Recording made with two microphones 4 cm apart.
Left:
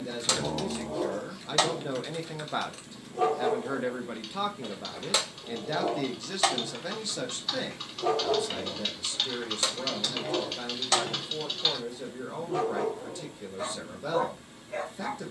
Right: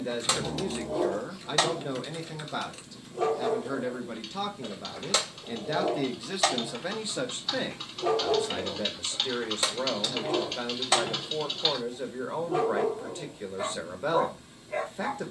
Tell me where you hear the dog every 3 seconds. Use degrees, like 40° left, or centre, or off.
10° right, 10° left, centre, 10° right, 10° right.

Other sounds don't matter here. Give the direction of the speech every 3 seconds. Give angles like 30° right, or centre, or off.
10° right, 10° left, 20° right, 40° right, 40° right.